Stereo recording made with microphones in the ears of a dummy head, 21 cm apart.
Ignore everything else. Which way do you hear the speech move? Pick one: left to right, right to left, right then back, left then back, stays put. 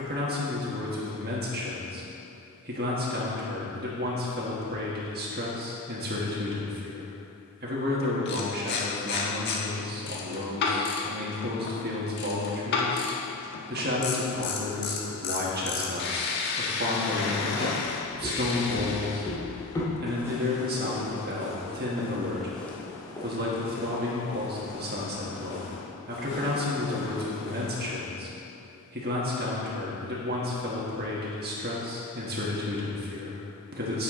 stays put.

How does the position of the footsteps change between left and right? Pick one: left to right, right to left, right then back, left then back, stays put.
right then back.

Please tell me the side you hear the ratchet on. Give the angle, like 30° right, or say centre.
50° left.